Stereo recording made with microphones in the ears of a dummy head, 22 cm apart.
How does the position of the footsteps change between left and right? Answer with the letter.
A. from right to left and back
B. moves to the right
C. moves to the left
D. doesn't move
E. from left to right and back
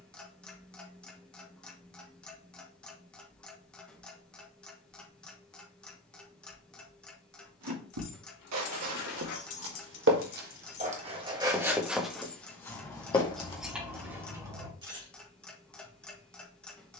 C.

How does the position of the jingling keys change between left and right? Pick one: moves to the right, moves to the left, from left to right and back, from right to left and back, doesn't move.
moves to the right.